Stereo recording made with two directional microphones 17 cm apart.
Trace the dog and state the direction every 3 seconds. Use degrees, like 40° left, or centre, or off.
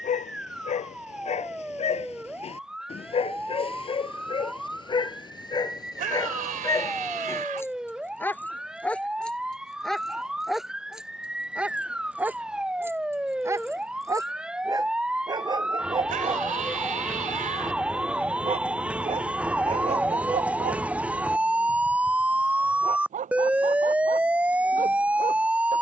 40° left, 30° left, 20° left, centre, 20° right, 30° right, 40° right, 50° right, 50° right.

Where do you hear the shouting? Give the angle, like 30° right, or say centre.
50° right.